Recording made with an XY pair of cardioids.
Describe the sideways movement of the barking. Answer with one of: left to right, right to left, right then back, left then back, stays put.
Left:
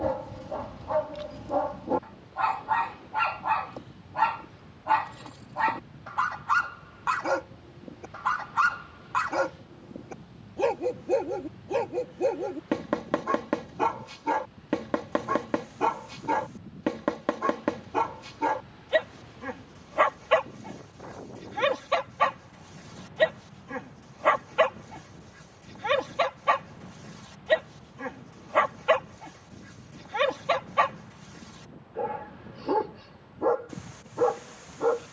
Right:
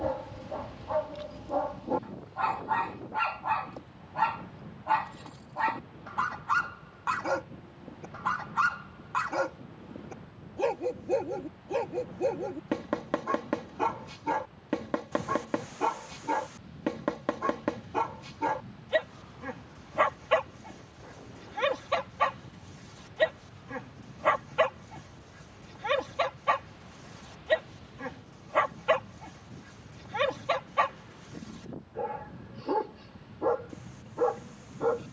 stays put.